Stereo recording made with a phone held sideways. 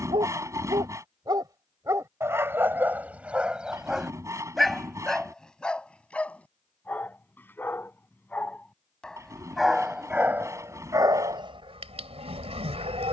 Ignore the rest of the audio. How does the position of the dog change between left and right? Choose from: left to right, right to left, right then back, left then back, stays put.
left then back.